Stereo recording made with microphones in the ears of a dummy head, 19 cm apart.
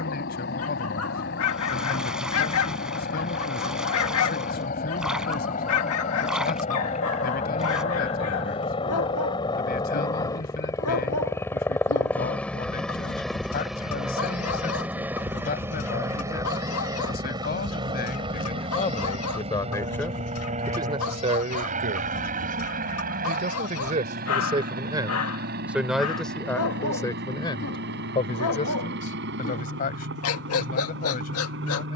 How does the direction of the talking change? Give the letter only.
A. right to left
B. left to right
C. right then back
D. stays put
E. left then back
C.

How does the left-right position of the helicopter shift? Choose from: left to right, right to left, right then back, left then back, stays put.
left to right.